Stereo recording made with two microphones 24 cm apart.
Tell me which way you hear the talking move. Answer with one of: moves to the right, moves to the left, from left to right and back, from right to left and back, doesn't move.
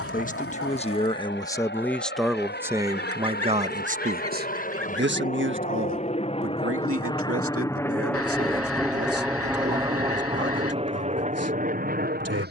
moves to the right.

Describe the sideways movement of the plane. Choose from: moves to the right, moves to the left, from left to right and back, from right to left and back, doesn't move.
moves to the right.